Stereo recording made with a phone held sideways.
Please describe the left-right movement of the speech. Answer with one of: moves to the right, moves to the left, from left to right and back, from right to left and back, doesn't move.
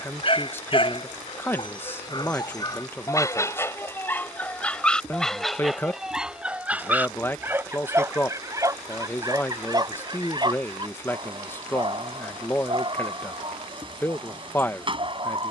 doesn't move.